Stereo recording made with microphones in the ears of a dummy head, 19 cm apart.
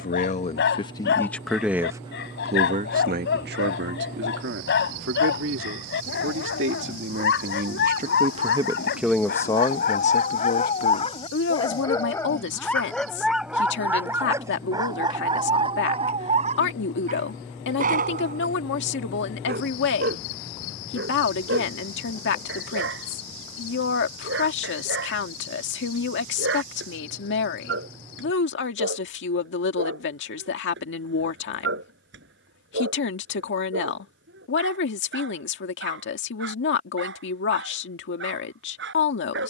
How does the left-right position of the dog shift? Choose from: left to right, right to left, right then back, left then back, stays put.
left to right.